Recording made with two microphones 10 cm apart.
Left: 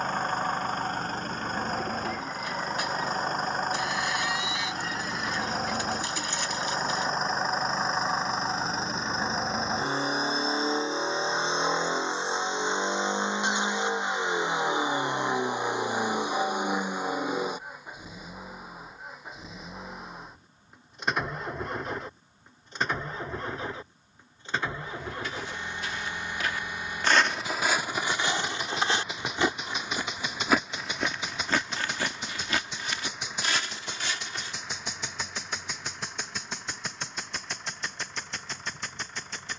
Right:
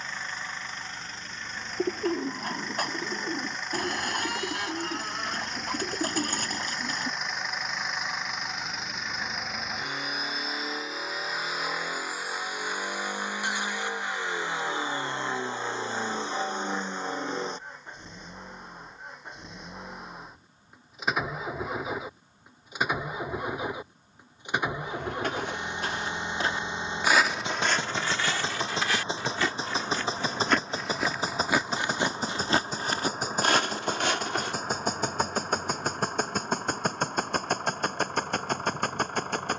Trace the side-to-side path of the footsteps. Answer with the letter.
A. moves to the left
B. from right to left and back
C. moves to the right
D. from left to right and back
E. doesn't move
B.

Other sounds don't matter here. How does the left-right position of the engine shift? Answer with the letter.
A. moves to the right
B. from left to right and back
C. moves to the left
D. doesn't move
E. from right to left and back
A.